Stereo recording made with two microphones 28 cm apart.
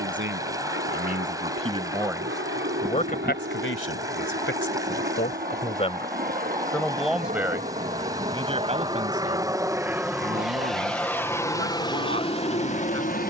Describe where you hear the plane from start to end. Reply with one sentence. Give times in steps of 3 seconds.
In this clip you hear the plane on the right from 0 s, in the centre from 9 s and on the left from 12 s.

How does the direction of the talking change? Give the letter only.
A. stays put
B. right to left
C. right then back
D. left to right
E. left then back
E.